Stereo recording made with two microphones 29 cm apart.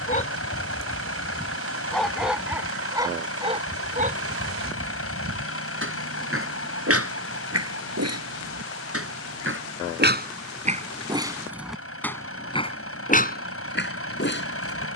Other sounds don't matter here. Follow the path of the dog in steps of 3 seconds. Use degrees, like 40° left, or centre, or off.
10° left, 30° right, 50° right, 30° right, 30° left.